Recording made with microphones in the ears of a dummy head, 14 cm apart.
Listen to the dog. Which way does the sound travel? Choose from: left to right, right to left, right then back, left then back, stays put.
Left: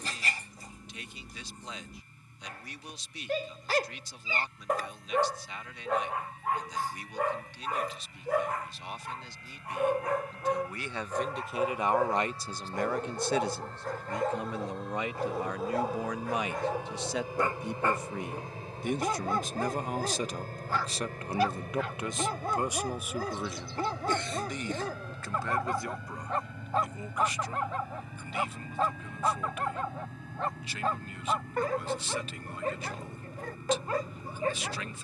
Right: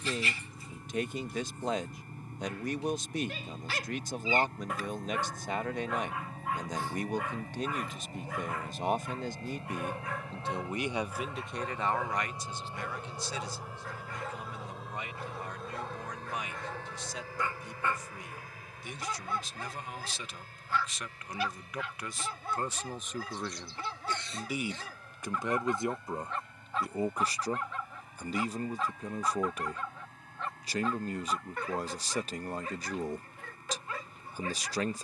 stays put.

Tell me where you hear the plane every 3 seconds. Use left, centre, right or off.
right, right, right, right, centre, centre, left, left, left, left, left, left.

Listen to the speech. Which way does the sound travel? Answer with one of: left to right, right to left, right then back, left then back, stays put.
left then back.